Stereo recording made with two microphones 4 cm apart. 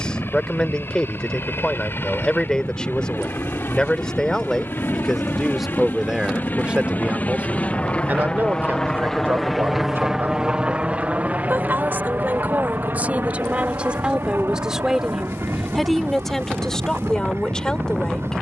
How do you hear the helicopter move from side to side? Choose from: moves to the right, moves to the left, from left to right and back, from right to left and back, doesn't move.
moves to the right.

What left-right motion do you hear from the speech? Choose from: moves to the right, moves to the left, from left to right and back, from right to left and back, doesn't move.
from left to right and back.